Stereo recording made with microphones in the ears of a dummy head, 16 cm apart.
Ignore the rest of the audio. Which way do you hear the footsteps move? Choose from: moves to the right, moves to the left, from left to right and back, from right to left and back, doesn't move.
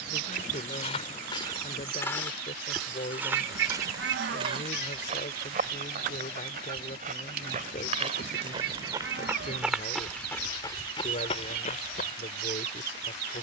from left to right and back.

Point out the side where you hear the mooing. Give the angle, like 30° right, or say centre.
70° right.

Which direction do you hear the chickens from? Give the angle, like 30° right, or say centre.
60° right.